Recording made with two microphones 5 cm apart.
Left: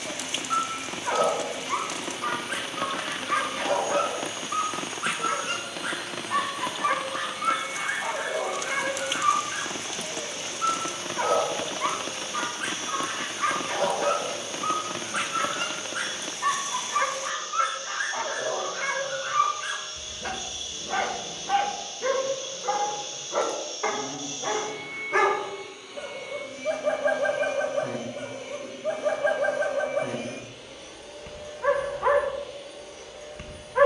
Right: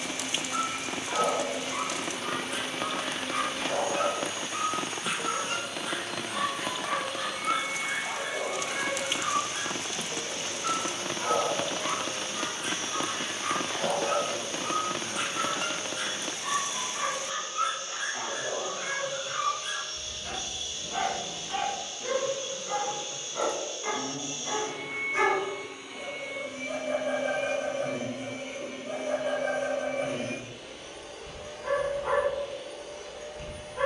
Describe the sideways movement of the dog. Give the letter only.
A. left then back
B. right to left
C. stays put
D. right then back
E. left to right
C.